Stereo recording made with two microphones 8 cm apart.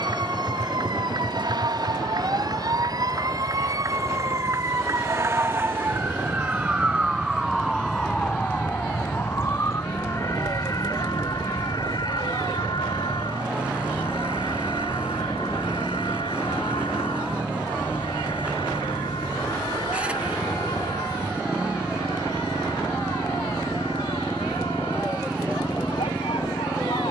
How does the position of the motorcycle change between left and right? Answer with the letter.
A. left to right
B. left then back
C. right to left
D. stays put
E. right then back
D.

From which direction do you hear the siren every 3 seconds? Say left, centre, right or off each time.
right, right, centre, left, left, left, left, left, left.